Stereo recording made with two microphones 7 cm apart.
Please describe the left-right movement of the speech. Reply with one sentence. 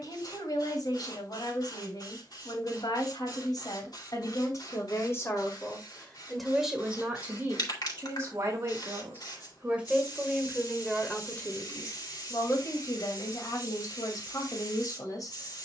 You can hear the speech move from left to right and back again.